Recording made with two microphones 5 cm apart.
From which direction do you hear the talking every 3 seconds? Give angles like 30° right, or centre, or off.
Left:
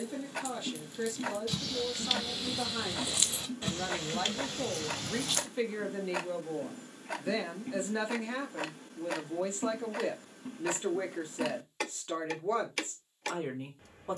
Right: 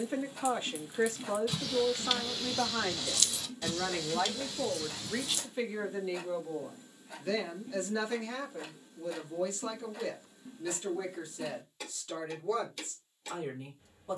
30° right, 10° right, 20° left, 30° left, 40° left.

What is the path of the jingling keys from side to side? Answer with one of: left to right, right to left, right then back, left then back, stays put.
right to left.